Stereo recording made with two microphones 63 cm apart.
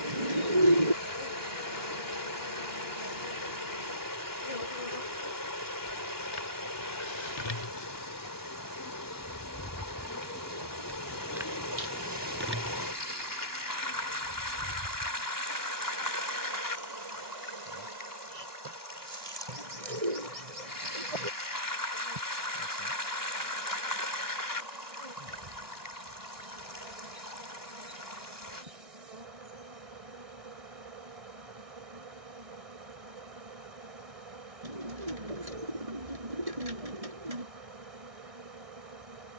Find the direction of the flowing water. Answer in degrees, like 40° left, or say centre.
30° left.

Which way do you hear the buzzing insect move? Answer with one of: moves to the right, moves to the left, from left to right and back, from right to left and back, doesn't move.
moves to the right.